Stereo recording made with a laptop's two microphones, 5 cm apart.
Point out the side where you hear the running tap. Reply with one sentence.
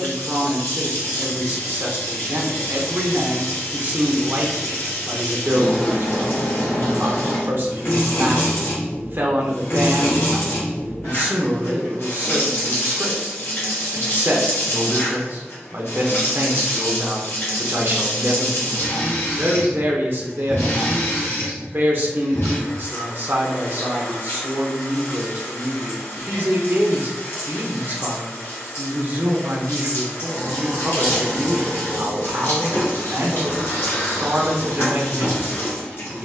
You can hear the running tap on the left.